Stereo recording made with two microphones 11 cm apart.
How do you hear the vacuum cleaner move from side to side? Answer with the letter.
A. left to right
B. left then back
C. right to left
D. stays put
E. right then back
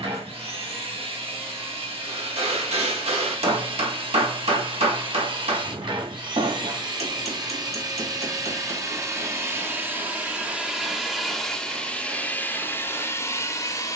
C.